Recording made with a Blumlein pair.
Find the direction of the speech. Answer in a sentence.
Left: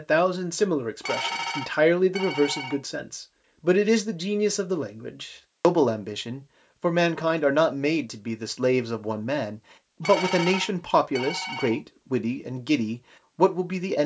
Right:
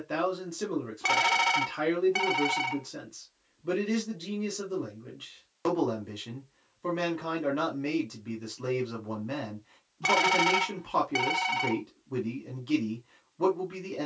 You can hear the speech on the left.